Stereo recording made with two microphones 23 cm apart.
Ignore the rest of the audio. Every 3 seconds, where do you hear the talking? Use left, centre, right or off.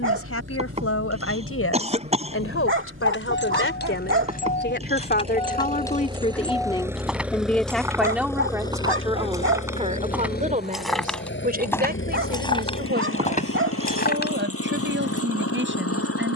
left, left, centre, right, right, right.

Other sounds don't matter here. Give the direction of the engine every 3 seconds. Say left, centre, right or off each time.
right, right, centre, left, left, left.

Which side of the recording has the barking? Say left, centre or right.
right.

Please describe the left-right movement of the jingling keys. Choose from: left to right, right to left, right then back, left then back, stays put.
right then back.